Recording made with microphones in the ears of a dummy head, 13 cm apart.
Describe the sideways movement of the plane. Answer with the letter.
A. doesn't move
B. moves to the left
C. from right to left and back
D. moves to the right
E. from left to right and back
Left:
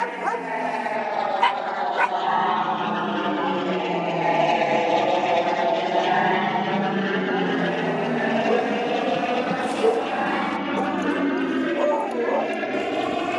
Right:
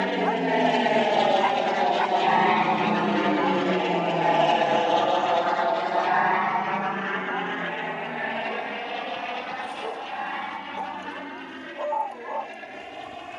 B.